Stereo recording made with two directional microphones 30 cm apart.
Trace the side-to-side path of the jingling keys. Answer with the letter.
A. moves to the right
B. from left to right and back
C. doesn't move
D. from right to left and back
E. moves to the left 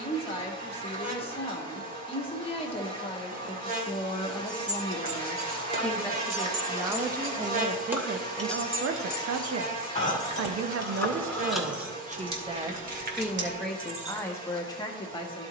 D.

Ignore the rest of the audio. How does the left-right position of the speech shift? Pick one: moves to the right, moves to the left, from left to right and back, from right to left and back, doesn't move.
from left to right and back.